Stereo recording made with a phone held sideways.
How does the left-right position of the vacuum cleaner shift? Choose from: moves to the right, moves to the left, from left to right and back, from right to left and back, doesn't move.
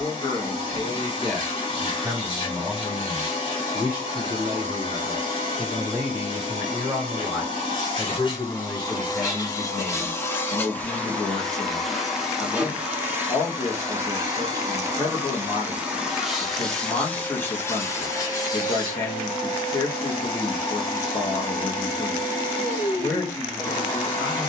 from left to right and back.